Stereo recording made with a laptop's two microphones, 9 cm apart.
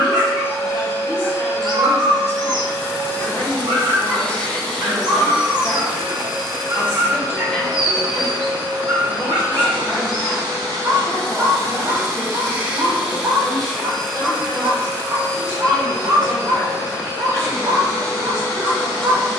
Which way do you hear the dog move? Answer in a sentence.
In this clip you hear the dog stay in one place.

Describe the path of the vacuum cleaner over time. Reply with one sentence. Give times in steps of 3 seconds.
In this clip you hear the vacuum cleaner on the left from 0 s, in the centre from 3 s, on the right from 6 s, in the centre from 12 s and on the left from 15 s.